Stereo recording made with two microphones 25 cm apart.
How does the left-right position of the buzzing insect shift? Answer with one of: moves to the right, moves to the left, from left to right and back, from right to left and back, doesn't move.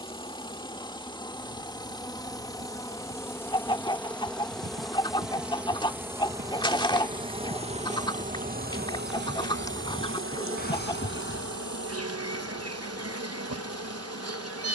moves to the right.